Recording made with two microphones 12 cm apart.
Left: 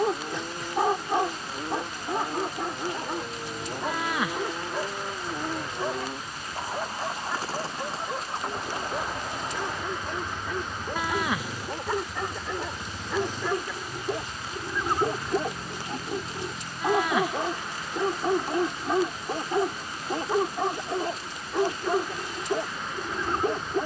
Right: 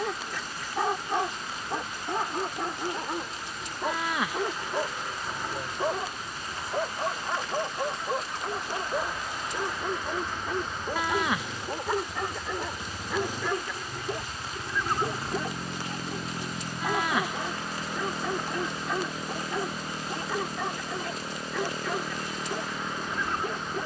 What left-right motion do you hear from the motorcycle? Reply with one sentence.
You can hear the motorcycle move to the right.